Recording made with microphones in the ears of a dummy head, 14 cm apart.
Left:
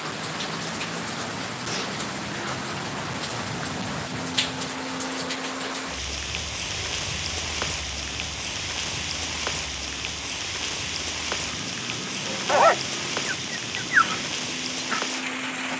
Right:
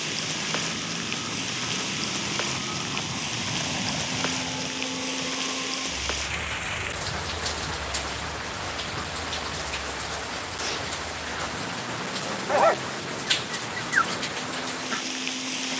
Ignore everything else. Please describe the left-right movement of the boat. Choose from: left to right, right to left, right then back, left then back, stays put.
right to left.